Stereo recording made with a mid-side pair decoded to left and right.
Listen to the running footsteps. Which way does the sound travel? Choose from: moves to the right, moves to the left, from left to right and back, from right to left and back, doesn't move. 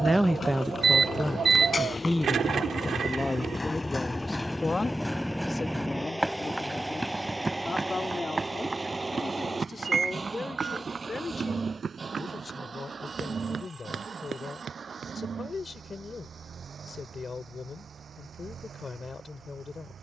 moves to the right.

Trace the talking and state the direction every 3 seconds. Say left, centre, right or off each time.
centre, left, left, left, left, left, left.